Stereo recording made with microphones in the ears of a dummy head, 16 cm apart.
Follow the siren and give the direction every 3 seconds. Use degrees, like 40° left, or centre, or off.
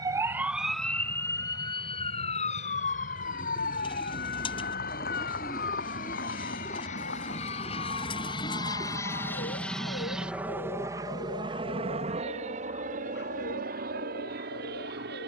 20° left, 60° left, 70° left, 70° left, 70° left.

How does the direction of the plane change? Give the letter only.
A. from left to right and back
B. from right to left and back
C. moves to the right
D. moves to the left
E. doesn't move
C.